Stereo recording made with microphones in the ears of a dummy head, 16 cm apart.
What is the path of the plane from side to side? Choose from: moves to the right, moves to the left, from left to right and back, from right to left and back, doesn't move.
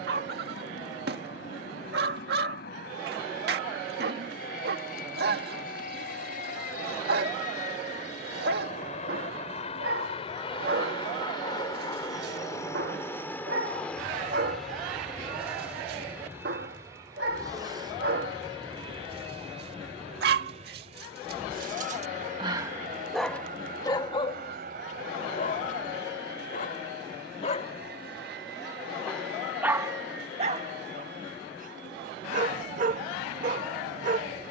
moves to the right.